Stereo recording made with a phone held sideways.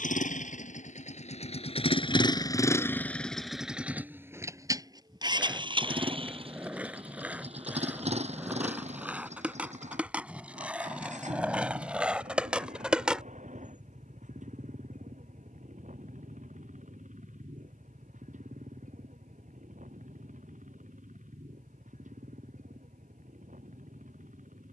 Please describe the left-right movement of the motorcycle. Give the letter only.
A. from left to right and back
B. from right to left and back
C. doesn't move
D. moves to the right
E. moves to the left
D.